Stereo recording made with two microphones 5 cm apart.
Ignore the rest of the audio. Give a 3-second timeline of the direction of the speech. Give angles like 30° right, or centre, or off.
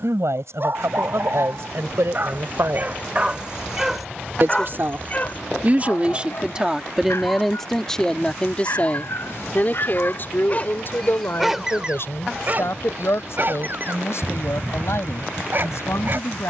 70° right, 40° right, centre, 50° left, 60° left, 70° left.